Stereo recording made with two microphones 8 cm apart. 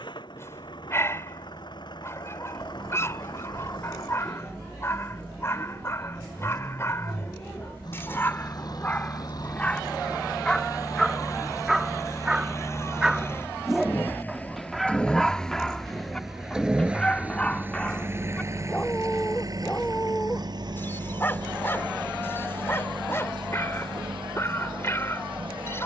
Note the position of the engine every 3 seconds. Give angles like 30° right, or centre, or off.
60° left, 60° left, 50° left, 40° left, 30° left, 10° right, 50° right, 70° right, 80° right.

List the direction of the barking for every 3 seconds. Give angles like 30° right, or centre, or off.
30° left, 30° left, 30° left, 10° left, centre, 10° left, 20° left, 30° left, 30° left.